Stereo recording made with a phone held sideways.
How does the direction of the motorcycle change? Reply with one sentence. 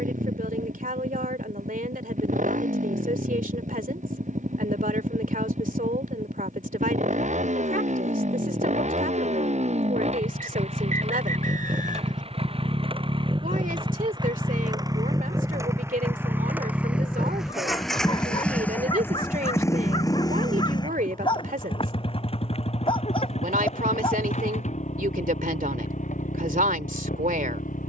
In this clip you hear the motorcycle move from right to left.